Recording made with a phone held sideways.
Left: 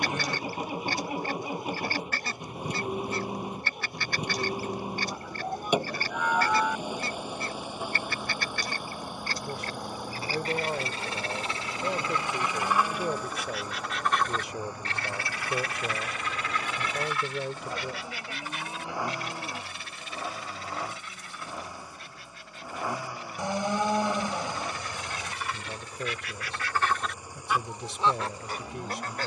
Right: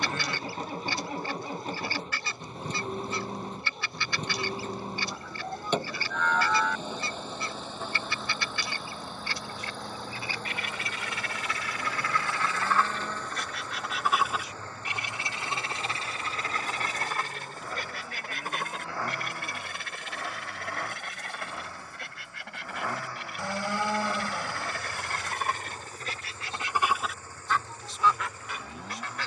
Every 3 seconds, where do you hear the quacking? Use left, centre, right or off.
left, left, left, left, centre, right, right, right, right, left.